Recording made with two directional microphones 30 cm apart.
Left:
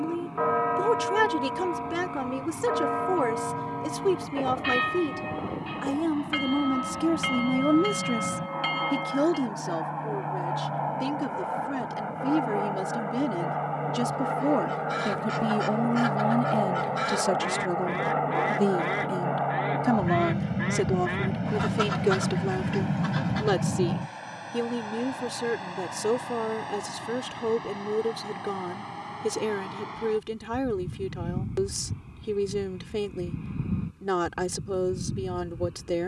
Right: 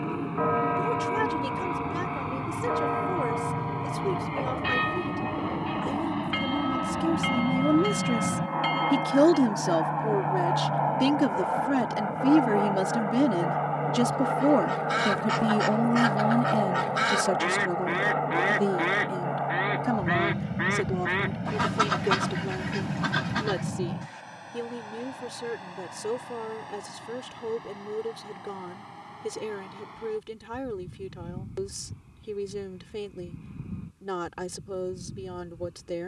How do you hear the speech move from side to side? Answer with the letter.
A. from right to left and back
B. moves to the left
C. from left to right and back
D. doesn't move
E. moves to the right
C.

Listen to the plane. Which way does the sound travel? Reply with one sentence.
In this clip you hear the plane move to the left.